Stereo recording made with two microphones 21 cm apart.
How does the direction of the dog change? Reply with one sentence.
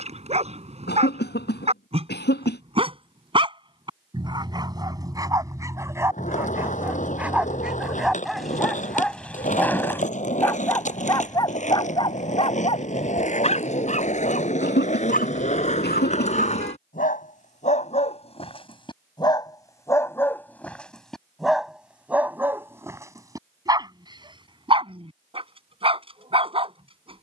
In this clip you hear the dog move from right to left and back again.